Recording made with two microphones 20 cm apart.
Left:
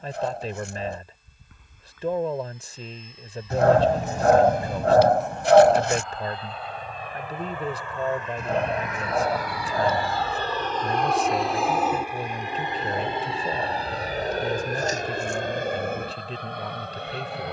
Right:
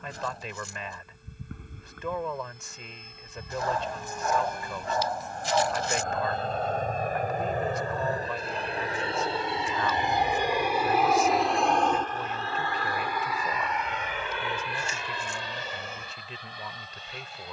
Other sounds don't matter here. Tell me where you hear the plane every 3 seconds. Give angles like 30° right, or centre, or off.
70° right, 60° right, 40° right, 10° right, 30° left, 50° left.